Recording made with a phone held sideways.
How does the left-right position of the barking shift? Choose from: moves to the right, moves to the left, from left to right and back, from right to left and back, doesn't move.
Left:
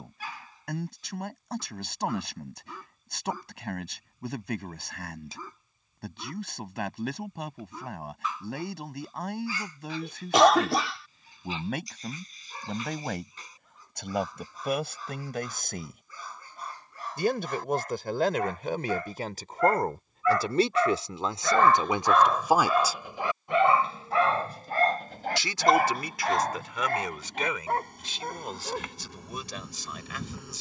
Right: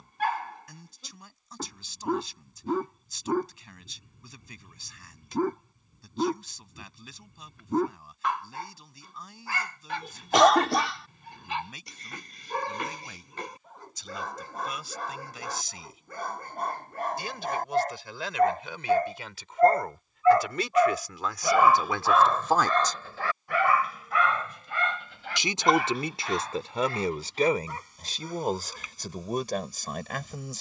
moves to the left.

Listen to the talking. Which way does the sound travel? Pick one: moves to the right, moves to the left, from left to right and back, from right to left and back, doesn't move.
moves to the right.